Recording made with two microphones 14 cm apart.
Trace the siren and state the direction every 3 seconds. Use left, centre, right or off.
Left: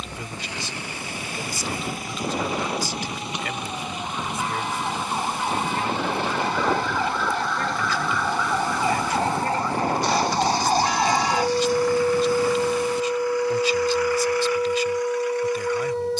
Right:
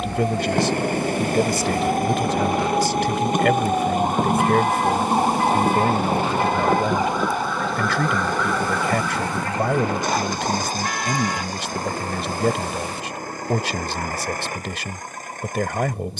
right, right, centre, left, left, left.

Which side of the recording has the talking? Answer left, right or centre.
right.